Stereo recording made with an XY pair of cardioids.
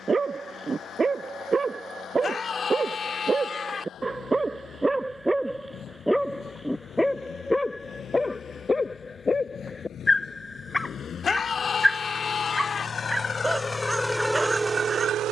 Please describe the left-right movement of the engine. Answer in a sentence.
In this clip you hear the engine move from left to right.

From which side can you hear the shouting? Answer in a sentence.
In this clip you hear the shouting on the left.